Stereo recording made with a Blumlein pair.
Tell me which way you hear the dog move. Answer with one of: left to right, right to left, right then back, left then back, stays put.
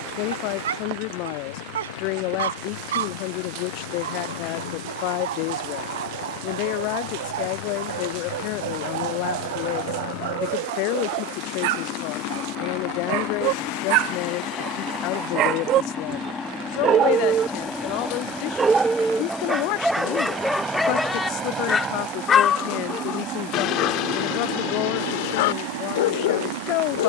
right to left.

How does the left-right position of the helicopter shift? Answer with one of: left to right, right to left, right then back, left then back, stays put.
left to right.